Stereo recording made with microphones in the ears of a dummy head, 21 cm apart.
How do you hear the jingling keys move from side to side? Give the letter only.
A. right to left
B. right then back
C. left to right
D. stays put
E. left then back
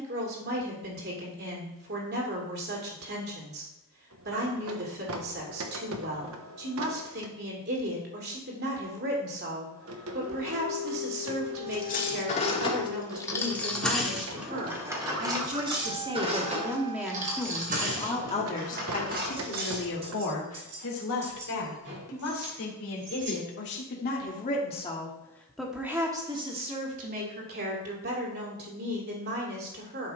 C.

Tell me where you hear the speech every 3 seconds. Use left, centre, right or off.
right, right, right, right, right, centre, left, left, centre, right.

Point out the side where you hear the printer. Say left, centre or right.
right.